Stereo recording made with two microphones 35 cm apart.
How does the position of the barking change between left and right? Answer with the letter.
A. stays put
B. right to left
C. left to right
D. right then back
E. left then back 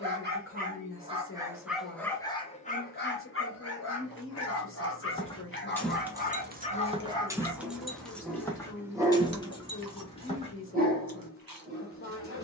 E.